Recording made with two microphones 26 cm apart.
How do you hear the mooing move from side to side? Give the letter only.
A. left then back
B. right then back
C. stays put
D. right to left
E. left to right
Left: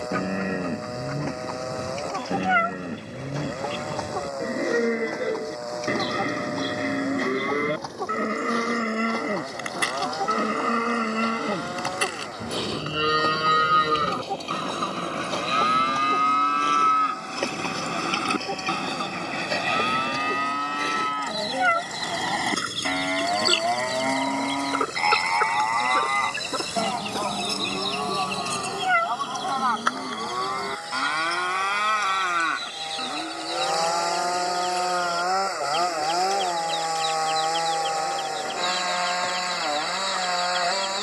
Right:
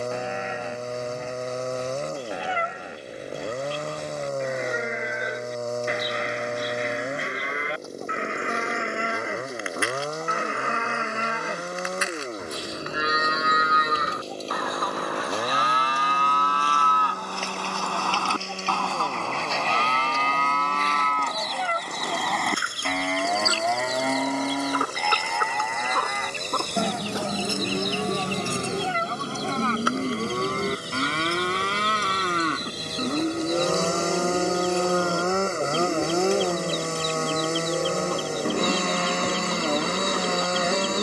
E.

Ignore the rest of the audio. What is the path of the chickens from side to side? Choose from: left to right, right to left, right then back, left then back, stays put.
left to right.